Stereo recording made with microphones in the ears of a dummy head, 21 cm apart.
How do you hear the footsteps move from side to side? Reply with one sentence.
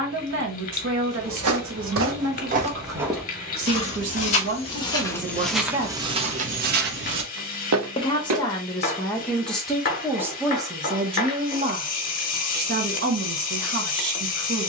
You can hear the footsteps move from right to left and back again.